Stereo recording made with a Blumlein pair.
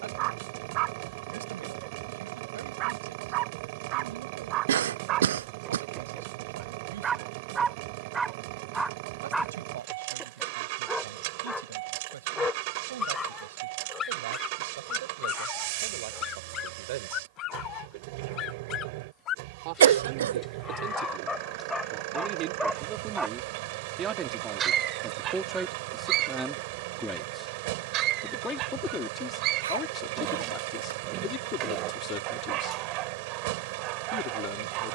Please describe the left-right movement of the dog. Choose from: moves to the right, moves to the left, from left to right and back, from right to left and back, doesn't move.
from right to left and back.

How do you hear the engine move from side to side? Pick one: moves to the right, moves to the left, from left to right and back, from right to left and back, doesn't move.
doesn't move.